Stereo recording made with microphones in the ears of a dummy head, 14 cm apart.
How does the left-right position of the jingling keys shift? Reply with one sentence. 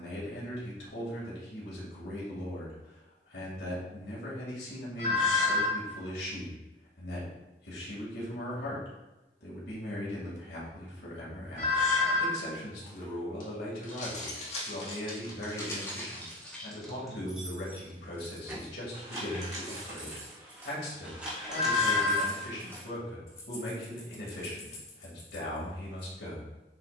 You can hear the jingling keys move from left to right and back again.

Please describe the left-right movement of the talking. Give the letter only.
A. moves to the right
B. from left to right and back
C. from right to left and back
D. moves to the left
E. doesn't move
E.